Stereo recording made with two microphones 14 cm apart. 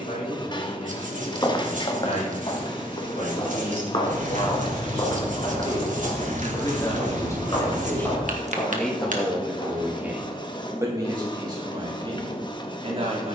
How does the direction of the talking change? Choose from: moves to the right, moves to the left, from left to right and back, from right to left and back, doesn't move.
moves to the right.